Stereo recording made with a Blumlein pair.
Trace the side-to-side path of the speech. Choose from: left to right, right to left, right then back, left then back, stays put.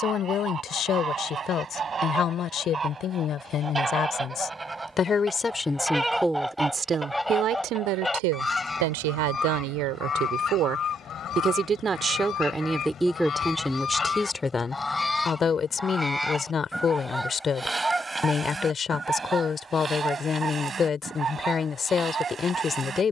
right then back.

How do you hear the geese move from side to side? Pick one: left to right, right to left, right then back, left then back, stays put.
left then back.